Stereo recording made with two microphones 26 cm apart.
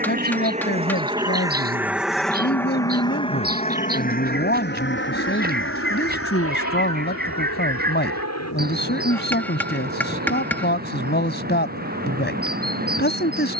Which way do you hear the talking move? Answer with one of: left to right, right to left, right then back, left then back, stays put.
stays put.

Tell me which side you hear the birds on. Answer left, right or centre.
right.